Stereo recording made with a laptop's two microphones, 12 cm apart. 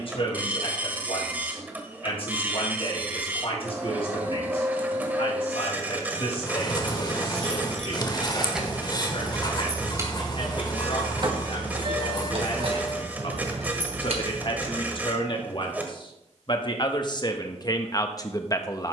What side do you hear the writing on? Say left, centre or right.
left.